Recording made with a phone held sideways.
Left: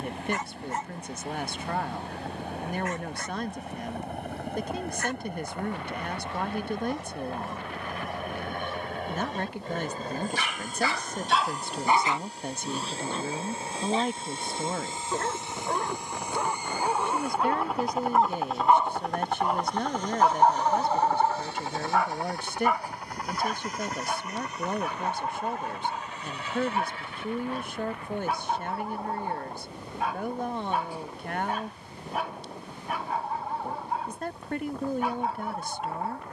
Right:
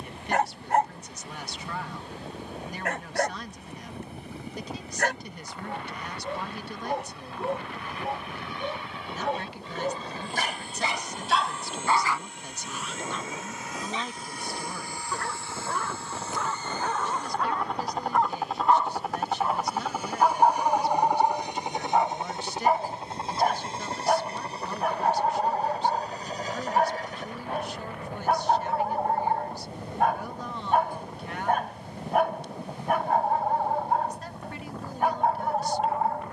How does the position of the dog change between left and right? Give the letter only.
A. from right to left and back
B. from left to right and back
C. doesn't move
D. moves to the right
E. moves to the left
A.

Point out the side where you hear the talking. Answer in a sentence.
You can hear the talking on the left.